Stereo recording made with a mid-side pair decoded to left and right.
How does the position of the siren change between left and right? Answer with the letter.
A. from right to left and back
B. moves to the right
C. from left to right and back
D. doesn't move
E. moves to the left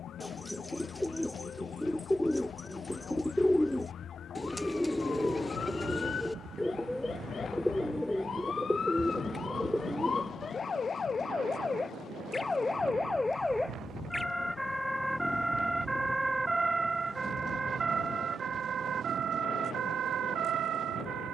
B.